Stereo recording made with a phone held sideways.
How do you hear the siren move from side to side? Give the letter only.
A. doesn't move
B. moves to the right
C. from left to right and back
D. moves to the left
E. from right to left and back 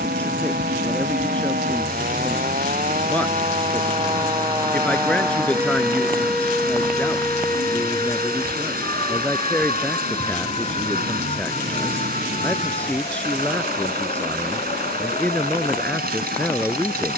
D.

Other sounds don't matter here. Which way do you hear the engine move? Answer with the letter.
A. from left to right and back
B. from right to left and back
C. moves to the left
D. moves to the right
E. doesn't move
E.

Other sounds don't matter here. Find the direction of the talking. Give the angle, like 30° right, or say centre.
10° left.